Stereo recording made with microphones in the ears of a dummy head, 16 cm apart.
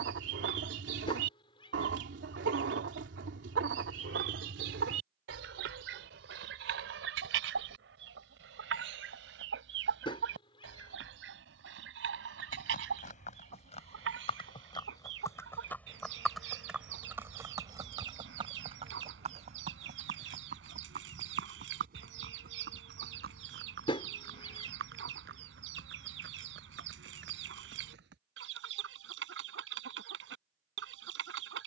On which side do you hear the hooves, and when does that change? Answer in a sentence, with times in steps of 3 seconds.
You can hear the hooves not at all from 0 s, on the left from 12 s, in the centre from 15 s, on the right from 18 s and not at all from 30 s.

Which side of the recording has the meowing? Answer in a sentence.
In this clip you hear the meowing on the left.